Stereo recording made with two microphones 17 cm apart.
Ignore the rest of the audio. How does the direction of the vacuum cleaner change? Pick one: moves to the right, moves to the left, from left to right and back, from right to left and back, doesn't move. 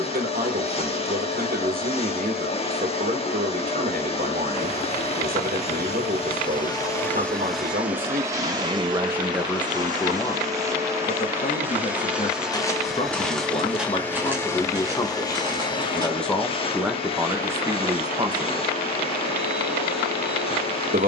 from left to right and back.